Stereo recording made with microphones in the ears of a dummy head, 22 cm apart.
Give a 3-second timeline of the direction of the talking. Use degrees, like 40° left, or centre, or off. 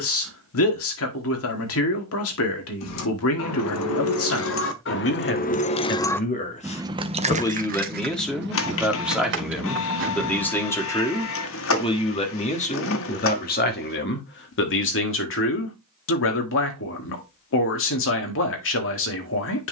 60° left, 60° left, 10° left, 10° left, 40° left, 60° left, 60° left.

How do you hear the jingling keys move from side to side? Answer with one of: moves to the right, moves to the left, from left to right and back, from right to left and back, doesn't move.
moves to the right.